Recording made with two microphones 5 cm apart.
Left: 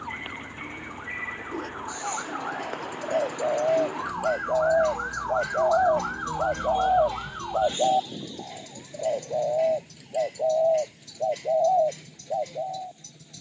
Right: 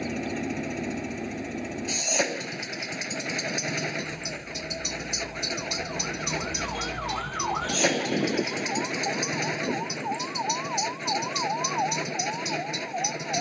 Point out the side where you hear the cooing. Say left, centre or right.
left.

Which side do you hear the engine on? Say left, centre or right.
right.